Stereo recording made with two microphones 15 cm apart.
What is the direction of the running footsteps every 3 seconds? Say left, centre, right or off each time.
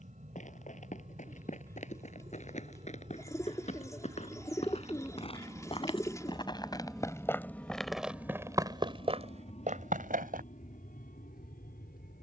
left, left, centre, right.